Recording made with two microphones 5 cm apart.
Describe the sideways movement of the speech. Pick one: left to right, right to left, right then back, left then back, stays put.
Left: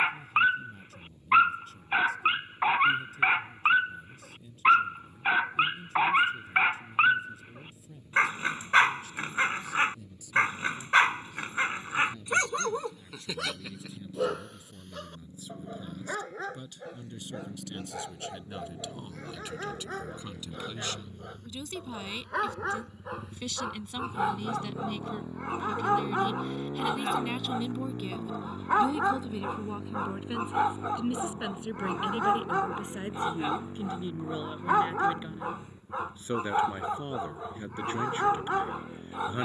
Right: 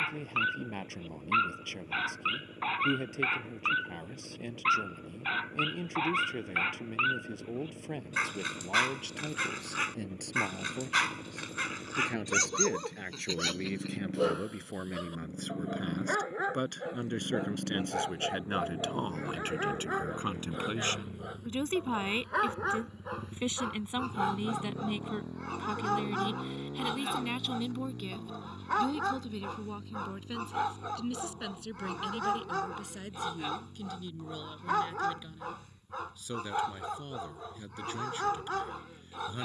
right to left.